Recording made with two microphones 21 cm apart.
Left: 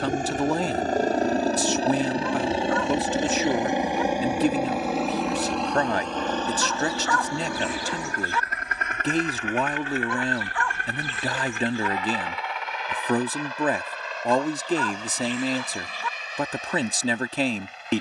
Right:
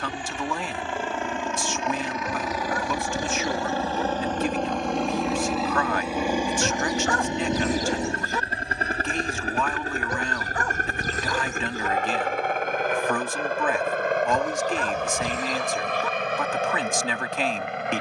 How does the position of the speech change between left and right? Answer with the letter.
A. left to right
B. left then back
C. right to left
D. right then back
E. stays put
E.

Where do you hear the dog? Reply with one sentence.
In this clip you hear the dog on the right.